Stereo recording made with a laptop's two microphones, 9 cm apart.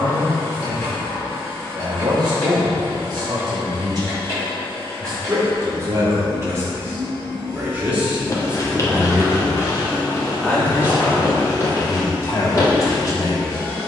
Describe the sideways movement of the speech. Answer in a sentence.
In this clip you hear the speech travel towards the left.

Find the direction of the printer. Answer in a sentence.
You can hear the printer on the left.